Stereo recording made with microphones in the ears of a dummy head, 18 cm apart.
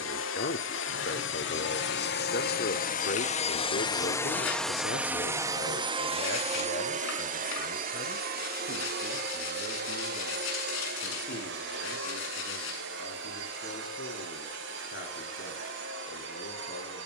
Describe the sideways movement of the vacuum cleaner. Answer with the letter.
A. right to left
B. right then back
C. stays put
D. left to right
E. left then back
D.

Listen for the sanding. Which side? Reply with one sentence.
In this clip you hear the sanding on the left.